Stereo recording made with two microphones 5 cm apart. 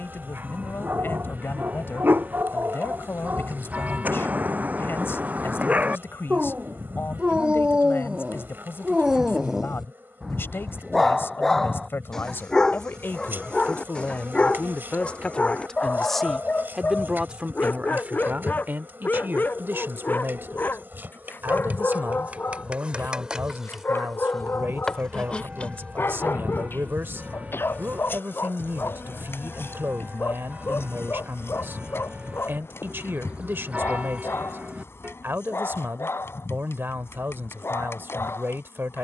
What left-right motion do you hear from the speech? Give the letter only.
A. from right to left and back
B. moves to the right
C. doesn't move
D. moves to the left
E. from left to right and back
B.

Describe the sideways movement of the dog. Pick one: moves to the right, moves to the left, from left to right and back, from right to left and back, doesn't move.
moves to the left.